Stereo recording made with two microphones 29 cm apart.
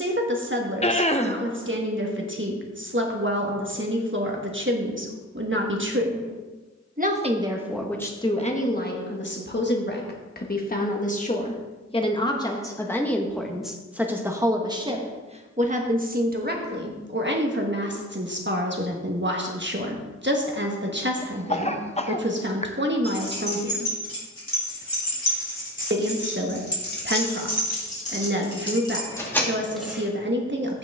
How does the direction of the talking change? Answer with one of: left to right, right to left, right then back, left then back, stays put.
left then back.